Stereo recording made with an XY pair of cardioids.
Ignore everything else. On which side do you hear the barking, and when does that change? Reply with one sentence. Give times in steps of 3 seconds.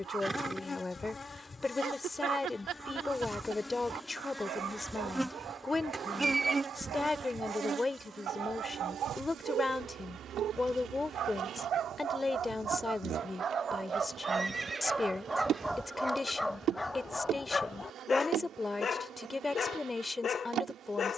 You can hear the barking on the right from 0 s, in the centre from 15 s and on the left from 18 s.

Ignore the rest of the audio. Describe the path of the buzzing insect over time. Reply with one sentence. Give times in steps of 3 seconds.
In this clip you hear the buzzing insect on the left from 0 s, in the centre from 3 s and on the right from 6 s.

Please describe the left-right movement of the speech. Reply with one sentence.
In this clip you hear the speech stay in one place.